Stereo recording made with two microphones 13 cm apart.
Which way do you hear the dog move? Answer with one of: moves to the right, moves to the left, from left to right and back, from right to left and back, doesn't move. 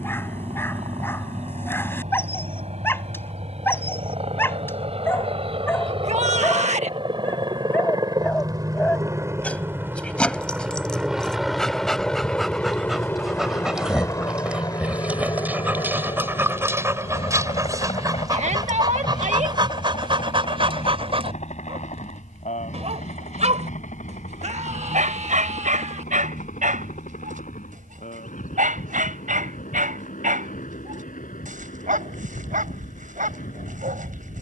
moves to the right.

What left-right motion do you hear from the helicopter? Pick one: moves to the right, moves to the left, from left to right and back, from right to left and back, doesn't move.
moves to the left.